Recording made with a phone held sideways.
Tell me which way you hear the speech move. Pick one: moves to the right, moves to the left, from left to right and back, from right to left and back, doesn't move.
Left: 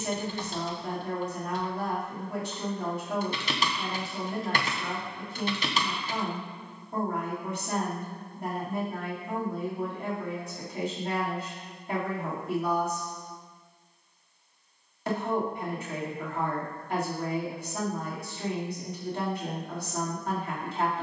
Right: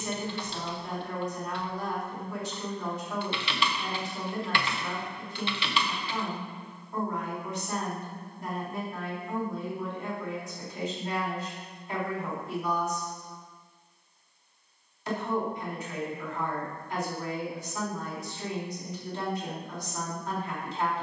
doesn't move.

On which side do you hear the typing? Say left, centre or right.
left.